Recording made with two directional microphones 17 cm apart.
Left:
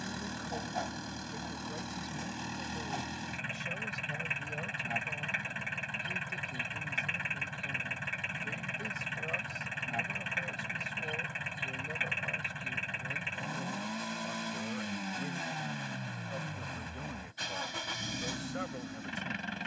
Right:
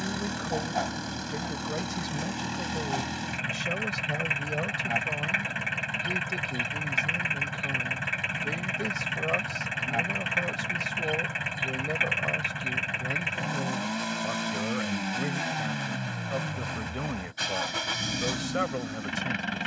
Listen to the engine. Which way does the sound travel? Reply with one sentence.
In this clip you hear the engine stay in one place.